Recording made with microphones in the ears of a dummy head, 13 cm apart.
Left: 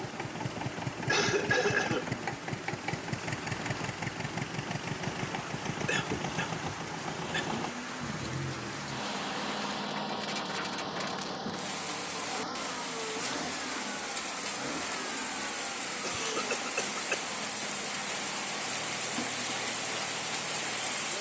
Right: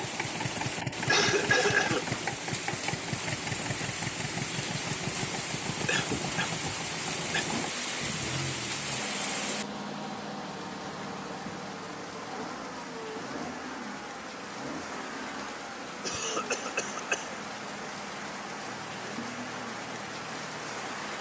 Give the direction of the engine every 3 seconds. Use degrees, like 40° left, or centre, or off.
20° right, 10° left, 30° left, 40° left, 50° left, 60° left, 60° left.